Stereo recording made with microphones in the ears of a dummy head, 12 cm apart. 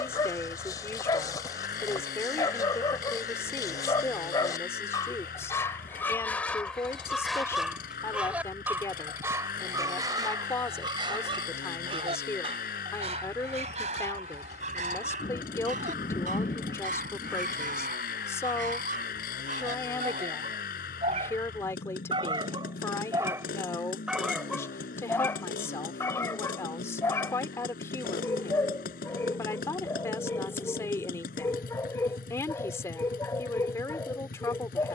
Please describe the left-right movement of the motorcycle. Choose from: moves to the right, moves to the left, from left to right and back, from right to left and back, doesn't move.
doesn't move.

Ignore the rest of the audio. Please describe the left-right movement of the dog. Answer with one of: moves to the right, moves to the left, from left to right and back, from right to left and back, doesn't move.
from left to right and back.